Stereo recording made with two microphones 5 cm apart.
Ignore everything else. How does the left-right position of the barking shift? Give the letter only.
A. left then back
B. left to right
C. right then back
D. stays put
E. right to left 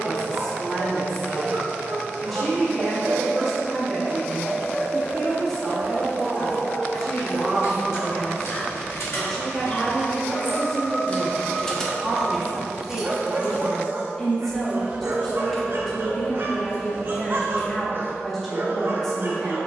A.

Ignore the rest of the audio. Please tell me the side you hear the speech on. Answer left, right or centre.
centre.